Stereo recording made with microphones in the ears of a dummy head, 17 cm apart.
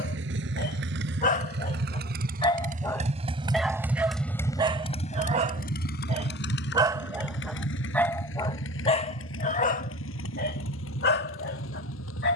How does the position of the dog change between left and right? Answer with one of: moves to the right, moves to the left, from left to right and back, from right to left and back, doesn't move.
from left to right and back.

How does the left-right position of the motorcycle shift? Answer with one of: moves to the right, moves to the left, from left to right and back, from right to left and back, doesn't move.
moves to the left.